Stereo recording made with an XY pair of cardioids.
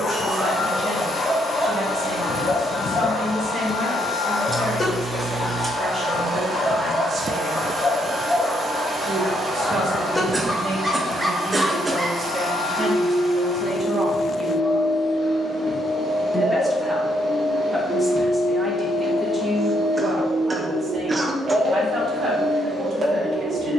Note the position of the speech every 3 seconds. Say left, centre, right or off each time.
right, right, right, right, right, centre, right, right.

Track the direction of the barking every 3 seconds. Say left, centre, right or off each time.
left, left, left, centre, right, right, right, right.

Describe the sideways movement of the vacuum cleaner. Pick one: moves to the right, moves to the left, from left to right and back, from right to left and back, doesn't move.
doesn't move.